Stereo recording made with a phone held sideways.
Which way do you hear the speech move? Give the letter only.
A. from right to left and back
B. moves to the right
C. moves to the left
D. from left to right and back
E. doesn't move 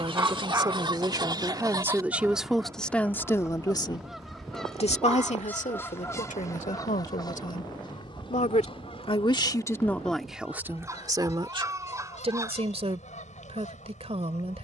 A.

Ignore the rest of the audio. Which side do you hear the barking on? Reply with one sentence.
In this clip you hear the barking on the right.